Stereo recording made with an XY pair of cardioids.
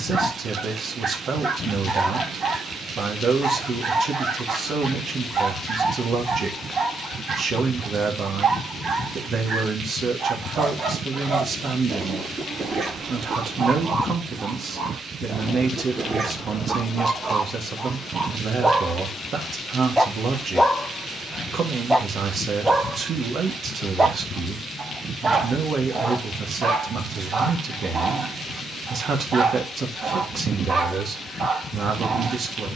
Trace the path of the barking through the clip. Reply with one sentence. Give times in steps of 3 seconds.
In this clip you hear the barking on the right from 0 s, in the centre from 18 s and on the right from 24 s.